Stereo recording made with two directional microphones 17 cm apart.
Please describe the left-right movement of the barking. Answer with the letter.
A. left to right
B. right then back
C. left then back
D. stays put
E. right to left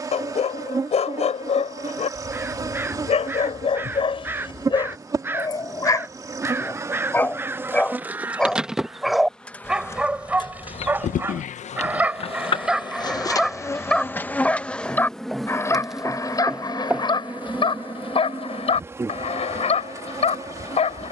B.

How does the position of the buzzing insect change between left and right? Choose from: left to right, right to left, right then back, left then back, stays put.
left then back.